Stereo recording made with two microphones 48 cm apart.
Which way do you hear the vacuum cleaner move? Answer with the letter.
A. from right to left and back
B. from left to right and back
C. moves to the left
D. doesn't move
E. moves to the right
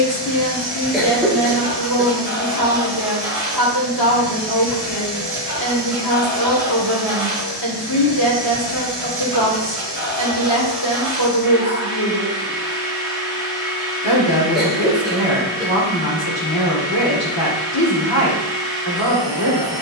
D.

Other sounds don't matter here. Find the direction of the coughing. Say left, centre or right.
centre.